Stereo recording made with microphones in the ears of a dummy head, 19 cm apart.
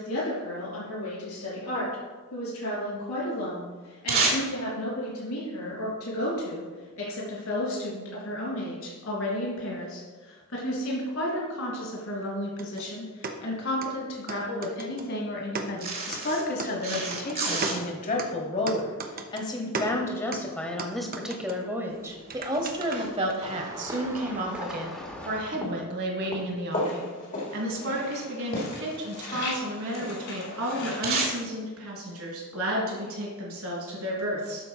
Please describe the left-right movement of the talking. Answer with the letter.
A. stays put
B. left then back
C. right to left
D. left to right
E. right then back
D.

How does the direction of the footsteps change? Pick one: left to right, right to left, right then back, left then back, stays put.
right to left.